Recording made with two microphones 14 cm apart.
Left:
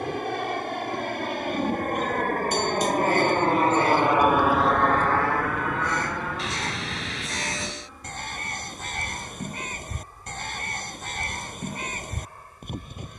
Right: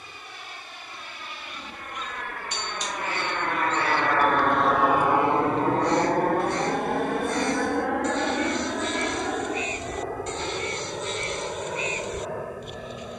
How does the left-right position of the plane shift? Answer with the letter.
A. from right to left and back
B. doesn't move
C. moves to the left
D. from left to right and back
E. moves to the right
E.